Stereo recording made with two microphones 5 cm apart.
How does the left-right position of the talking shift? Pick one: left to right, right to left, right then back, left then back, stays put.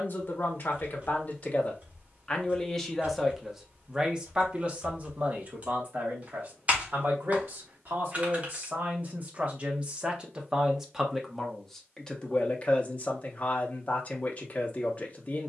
right then back.